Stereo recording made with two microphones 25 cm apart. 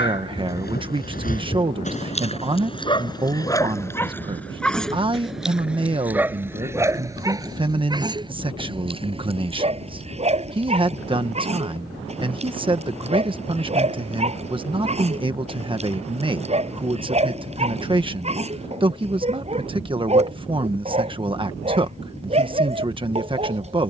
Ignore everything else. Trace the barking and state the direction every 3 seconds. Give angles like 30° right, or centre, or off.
30° left, 10° left, 10° right, 20° right, 20° right, 20° right, 20° right, 20° right.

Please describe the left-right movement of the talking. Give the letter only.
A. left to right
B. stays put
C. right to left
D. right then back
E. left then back
B.